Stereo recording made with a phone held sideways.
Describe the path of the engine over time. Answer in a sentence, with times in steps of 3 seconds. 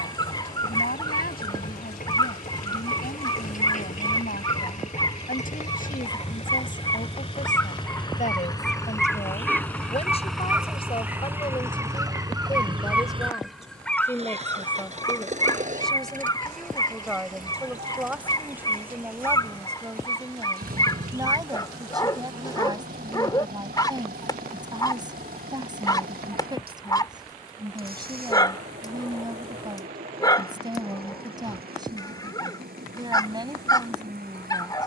In this clip you hear the engine on the left from 0 s, in the centre from 9 s and on the right from 12 s.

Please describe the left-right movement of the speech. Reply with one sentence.
You can hear the speech move from left to right.